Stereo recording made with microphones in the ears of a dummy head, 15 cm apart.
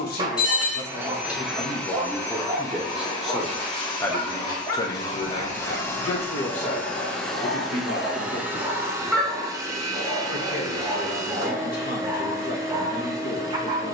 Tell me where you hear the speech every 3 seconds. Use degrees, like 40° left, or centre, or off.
20° left, 20° left, 50° left, 50° left, 50° left.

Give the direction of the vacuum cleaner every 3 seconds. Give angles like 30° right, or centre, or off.
centre, 20° left, centre, 20° right, 20° right.